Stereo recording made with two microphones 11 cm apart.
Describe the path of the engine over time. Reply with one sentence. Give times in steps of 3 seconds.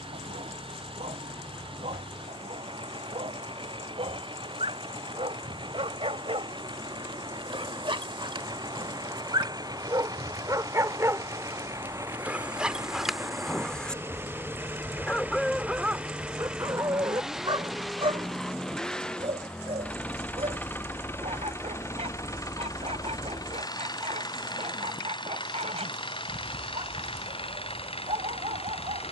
You can hear the engine on the right from 0 s, in the centre from 15 s and on the left from 21 s.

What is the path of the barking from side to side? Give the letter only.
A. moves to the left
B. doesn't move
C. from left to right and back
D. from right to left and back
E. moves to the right
D.